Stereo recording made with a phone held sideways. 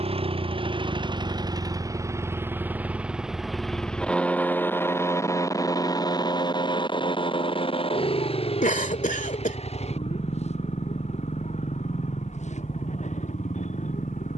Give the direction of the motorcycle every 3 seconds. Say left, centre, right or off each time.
right, centre, left, left, left.